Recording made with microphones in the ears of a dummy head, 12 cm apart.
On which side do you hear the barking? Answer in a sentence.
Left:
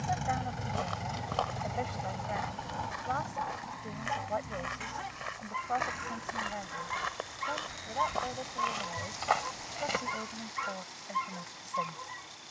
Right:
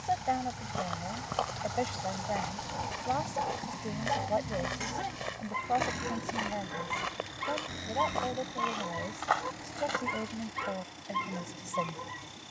In this clip you hear the barking on the right.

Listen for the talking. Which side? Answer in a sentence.
You can hear the talking on the right.